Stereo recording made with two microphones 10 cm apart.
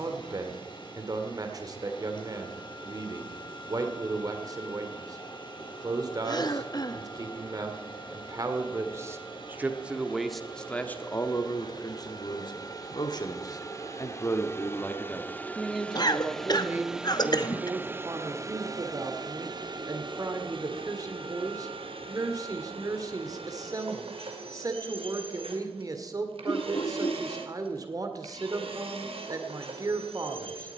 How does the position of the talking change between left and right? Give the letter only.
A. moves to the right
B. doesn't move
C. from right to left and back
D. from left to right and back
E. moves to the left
C.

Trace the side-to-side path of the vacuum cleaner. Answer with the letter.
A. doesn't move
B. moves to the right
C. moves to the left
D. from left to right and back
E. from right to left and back
B.